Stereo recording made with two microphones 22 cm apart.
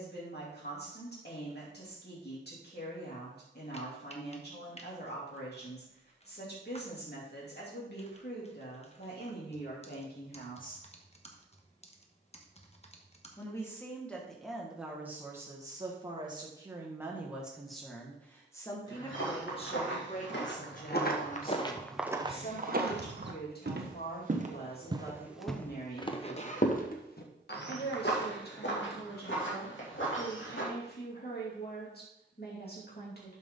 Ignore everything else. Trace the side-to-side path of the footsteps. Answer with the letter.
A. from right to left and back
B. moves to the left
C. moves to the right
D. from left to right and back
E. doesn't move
D.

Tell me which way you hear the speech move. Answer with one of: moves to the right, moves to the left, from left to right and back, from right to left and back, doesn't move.
from left to right and back.